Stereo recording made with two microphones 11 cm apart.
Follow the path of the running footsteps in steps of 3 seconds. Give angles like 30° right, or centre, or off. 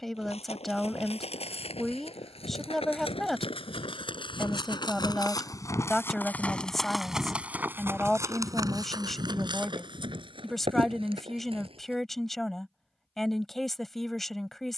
70° left, 50° left, 10° right, 50° right, off.